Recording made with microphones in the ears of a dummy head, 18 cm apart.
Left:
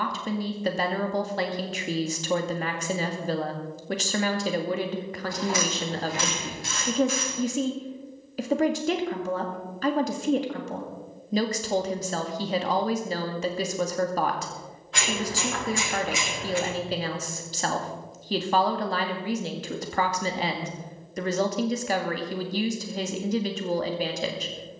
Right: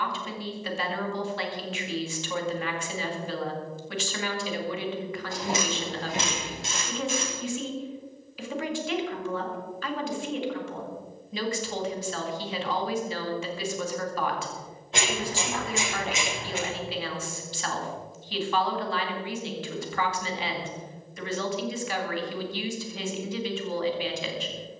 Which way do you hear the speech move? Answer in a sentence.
In this clip you hear the speech stay in one place.